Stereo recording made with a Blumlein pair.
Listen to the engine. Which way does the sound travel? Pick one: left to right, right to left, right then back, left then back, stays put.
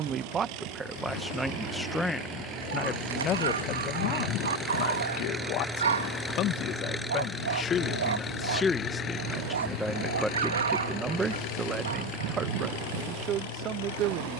right to left.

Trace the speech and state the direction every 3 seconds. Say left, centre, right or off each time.
centre, left, left, centre, right.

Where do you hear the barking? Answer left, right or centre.
right.